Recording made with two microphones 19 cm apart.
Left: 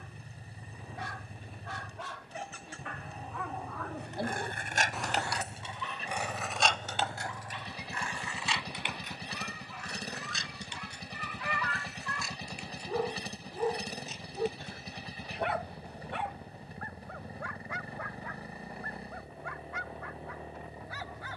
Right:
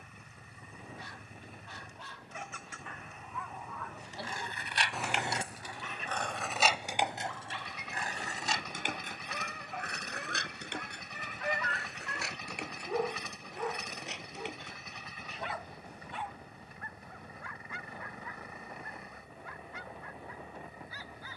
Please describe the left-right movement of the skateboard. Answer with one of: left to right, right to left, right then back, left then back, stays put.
left to right.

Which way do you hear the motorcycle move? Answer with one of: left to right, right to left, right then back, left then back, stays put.
stays put.